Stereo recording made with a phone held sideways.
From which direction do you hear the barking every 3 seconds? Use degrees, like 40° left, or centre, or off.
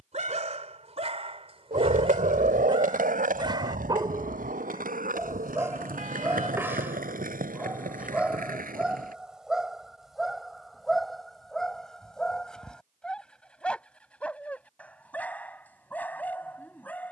40° right, 20° right, 10° right, centre, 10° left, 10° left.